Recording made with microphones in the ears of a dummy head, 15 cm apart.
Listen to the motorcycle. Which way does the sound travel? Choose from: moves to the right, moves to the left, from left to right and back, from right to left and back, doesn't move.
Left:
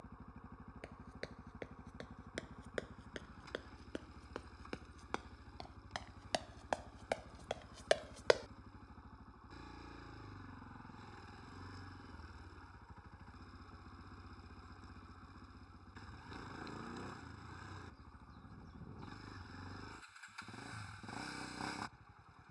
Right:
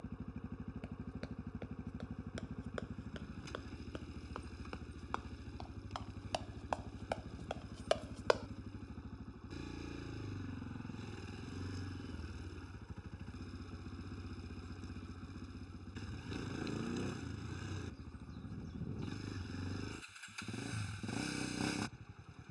doesn't move.